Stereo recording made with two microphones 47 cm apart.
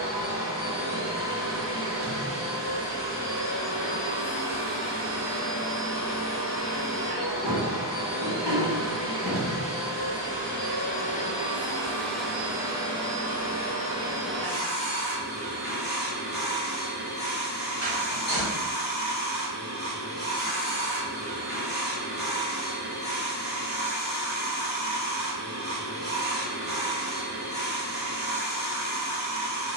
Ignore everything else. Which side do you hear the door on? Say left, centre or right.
left.